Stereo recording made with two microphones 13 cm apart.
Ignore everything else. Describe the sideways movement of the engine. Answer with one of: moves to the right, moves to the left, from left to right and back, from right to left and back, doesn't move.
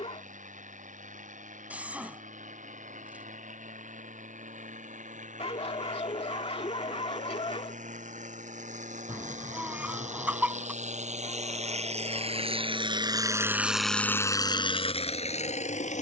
moves to the left.